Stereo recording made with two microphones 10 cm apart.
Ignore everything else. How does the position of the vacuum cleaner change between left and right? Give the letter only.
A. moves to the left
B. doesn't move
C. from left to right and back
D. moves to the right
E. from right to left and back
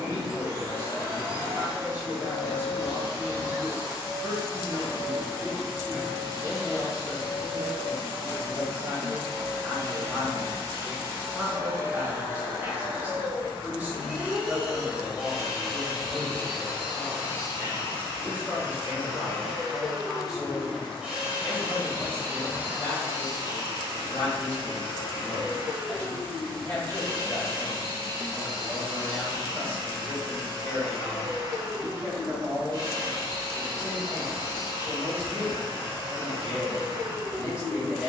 E.